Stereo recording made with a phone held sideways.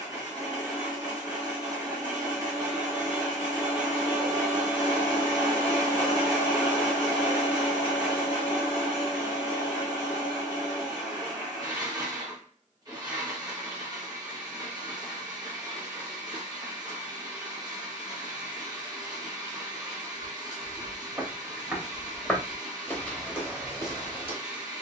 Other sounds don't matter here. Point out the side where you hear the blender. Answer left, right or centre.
right.